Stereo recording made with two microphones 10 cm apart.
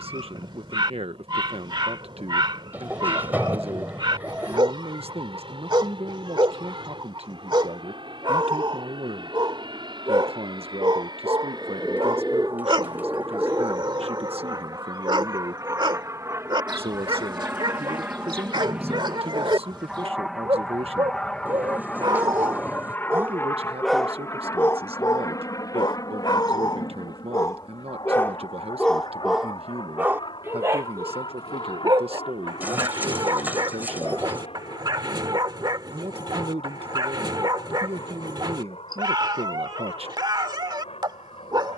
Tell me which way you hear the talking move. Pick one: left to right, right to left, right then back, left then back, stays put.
stays put.